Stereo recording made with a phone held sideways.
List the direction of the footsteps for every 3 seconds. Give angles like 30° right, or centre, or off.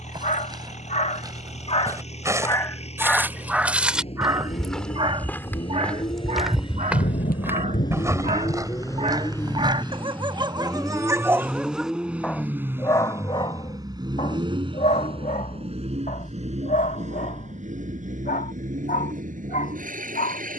30° right, centre, 10° right, 30° right, off, off, off.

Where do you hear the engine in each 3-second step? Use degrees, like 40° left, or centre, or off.
50° left, 40° left, 30° left, 10° left, 20° right, 50° right, 70° right.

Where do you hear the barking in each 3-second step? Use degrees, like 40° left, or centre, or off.
40° left, 20° right, 50° right, 30° right, 30° left, 70° left, 70° left.